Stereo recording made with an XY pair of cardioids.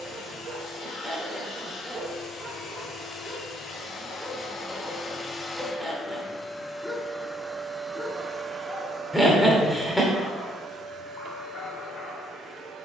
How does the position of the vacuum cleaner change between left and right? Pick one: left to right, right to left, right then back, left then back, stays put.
left to right.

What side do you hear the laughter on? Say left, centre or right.
centre.